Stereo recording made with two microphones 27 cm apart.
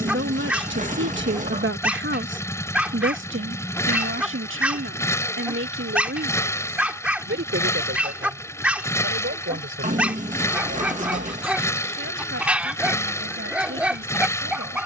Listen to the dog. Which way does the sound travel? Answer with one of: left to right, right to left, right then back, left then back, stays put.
stays put.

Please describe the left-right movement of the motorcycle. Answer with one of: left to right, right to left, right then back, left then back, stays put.
stays put.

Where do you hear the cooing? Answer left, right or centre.
right.